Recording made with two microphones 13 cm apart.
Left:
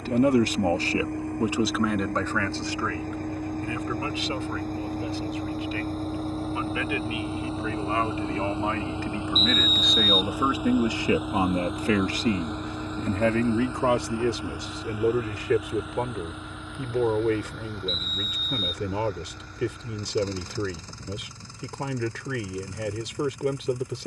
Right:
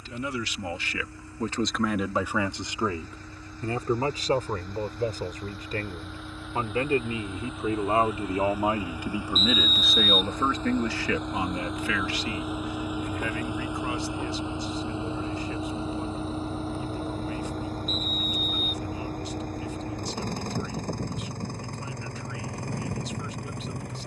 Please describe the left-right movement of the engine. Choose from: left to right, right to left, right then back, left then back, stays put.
left to right.